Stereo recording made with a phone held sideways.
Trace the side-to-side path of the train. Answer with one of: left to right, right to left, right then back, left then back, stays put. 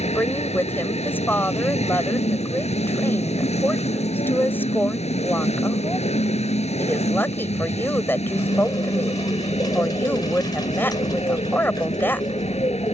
stays put.